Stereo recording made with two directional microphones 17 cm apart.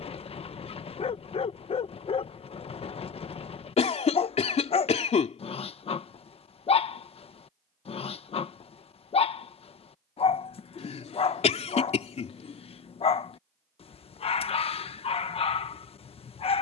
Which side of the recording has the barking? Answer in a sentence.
You can hear the barking on the left.